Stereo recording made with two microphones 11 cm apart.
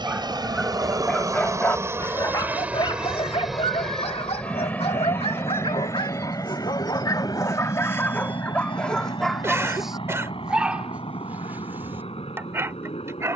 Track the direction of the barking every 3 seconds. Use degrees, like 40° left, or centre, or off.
20° left, 70° left, 30° left, 10° right, 20° right.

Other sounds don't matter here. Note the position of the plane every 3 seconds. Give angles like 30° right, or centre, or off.
30° right, 10° left, 40° left, 50° left, 50° left.